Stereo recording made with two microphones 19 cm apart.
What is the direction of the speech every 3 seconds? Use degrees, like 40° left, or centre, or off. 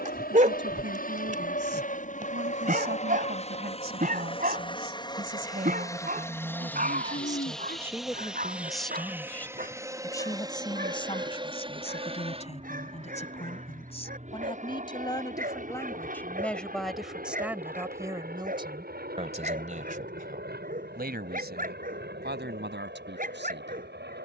70° right, 50° right, 20° right, 20° left, 30° left, 10° left, 30° right, 60° right.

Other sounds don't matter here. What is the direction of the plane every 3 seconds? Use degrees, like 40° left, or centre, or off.
50° left, 30° left, centre, 20° right, 30° right, 40° right, 50° right, 50° right.